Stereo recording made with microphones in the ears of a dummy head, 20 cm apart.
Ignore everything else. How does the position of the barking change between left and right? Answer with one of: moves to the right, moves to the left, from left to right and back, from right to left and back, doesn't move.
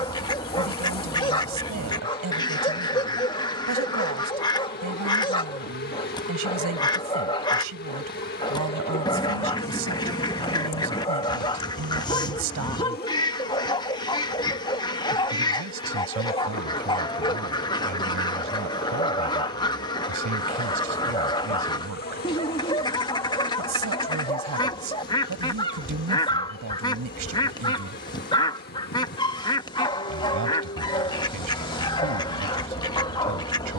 doesn't move.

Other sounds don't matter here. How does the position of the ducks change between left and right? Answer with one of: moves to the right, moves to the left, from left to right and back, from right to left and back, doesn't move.
doesn't move.